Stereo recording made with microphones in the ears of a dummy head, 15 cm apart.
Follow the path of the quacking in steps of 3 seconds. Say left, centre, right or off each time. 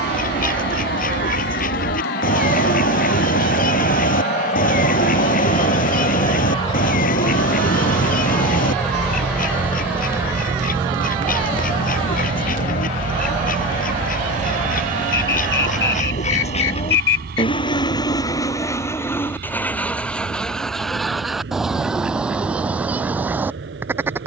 left, left, left, left, left, left, centre, centre.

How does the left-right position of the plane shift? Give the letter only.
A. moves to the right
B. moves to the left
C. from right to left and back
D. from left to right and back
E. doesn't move
A.